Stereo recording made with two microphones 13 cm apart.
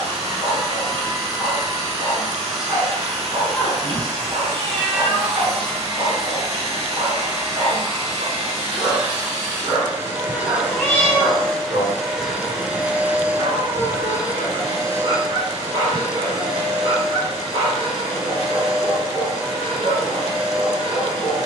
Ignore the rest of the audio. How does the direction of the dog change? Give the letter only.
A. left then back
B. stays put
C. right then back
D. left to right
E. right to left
B.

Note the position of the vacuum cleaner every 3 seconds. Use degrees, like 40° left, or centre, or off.
50° right, 50° right, 50° right, 10° right, 20° right, 40° right, 50° right.